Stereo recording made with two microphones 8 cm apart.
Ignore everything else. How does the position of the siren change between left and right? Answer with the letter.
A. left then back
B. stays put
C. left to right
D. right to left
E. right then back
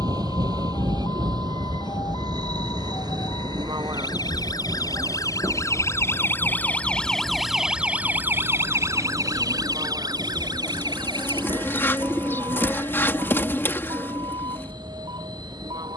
C.